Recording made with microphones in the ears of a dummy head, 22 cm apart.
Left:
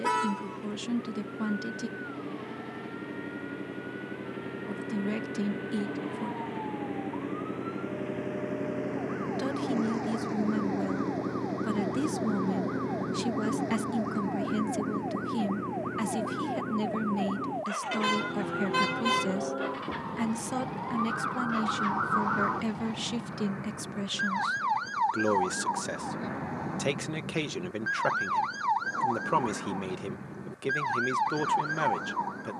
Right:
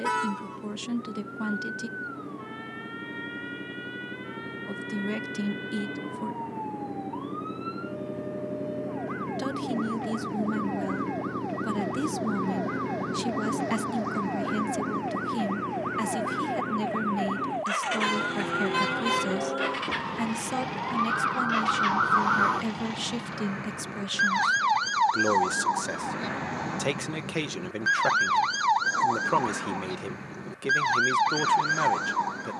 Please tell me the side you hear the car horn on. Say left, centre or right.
centre.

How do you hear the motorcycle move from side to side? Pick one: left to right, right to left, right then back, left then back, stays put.
left to right.